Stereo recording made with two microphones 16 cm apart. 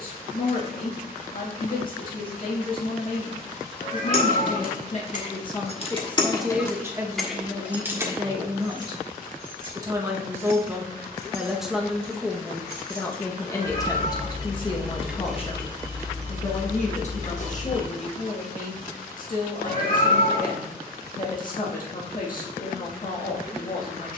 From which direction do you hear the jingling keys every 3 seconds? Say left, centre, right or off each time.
off, left, centre, right, right, left, off, off.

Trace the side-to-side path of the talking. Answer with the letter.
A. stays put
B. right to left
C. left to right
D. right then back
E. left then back
D.